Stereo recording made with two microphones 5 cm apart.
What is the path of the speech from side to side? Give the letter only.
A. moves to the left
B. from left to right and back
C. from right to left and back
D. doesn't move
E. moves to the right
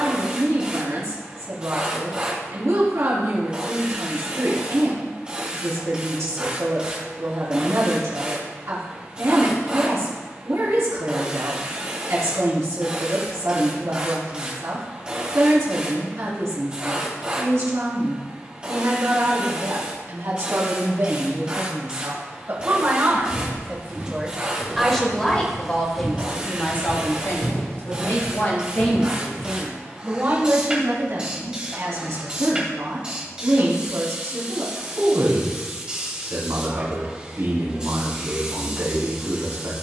C.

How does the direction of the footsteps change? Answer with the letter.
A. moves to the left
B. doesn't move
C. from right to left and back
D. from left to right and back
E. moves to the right
A.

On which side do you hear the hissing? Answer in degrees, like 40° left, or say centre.
20° right.